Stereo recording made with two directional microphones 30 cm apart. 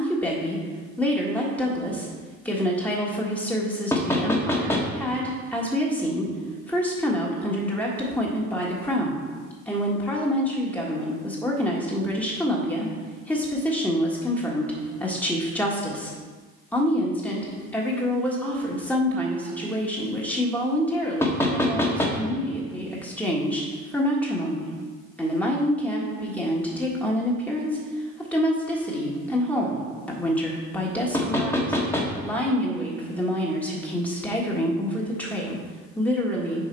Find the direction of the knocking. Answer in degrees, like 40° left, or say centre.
10° left.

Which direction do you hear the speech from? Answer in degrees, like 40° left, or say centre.
centre.